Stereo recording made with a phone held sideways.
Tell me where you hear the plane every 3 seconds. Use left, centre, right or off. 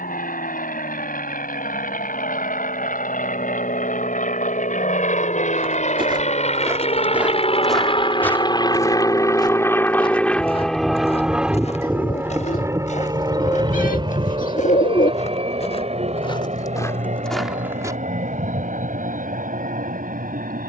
left, left, left, centre, right, right, right.